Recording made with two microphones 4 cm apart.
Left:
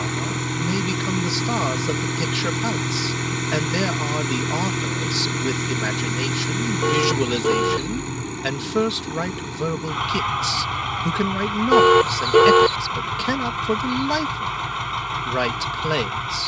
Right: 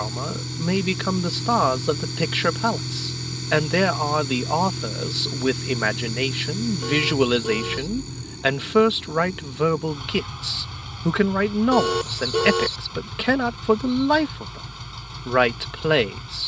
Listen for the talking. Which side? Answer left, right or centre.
right.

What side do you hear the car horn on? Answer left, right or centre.
left.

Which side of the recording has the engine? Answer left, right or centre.
left.